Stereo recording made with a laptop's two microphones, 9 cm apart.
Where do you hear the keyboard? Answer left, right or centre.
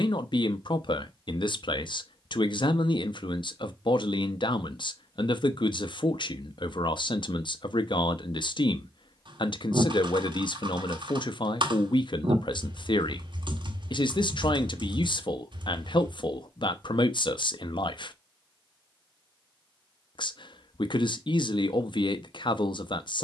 right.